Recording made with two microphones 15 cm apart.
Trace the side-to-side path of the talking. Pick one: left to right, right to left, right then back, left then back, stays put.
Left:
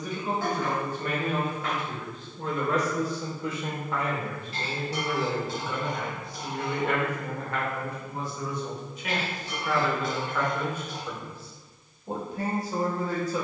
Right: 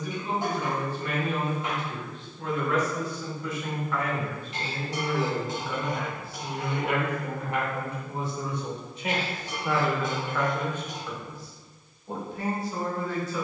right then back.